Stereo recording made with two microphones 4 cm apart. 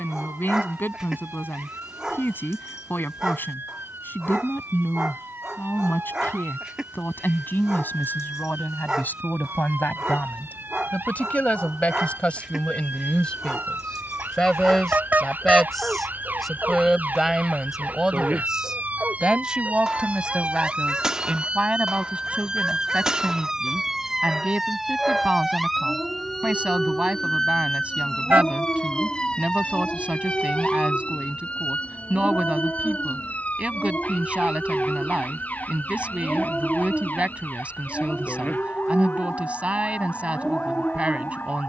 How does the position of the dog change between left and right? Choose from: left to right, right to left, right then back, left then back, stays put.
left then back.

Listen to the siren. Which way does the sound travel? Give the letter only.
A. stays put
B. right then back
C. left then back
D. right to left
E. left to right
D.